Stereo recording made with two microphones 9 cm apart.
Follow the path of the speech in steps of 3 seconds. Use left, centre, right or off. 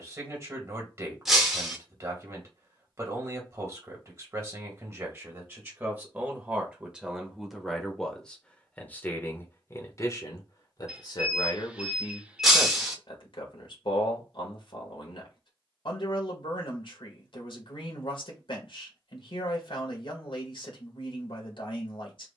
right, right, centre, left, left, left, left, left.